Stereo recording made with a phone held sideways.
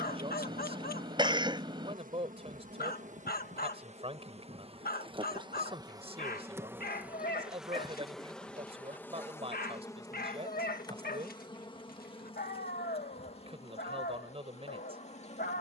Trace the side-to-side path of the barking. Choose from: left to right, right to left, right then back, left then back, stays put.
stays put.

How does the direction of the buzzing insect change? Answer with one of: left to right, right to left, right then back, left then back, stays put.
right to left.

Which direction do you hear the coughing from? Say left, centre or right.
right.